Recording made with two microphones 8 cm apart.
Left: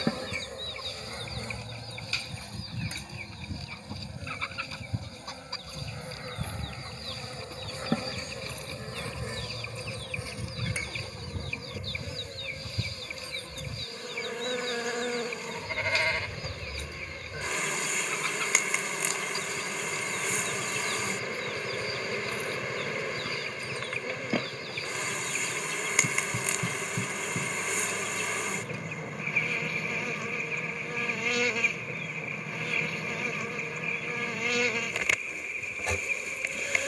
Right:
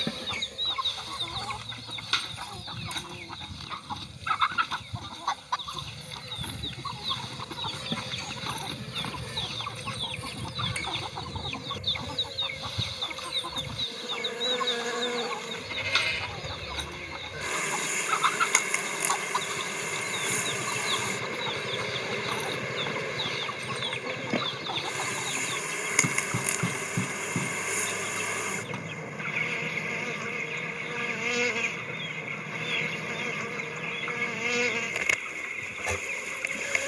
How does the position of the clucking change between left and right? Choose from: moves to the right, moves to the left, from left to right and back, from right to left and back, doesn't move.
doesn't move.